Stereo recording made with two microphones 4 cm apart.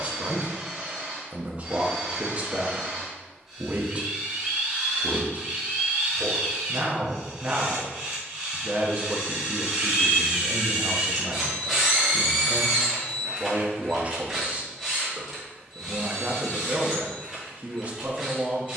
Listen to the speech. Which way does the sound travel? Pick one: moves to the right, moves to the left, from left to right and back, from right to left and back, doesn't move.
doesn't move.